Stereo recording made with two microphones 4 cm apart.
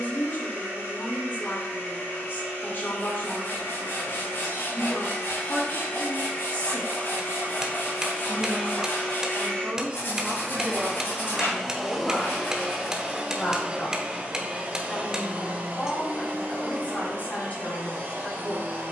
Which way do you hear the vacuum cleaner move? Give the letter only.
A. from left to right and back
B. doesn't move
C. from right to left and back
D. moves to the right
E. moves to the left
D.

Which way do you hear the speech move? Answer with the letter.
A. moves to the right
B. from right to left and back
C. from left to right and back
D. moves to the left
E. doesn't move
C.